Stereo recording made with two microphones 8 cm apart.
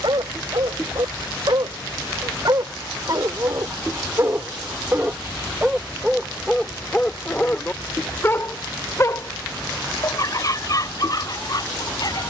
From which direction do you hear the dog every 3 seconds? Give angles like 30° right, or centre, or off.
60° right, 30° right, 20° left, 50° left.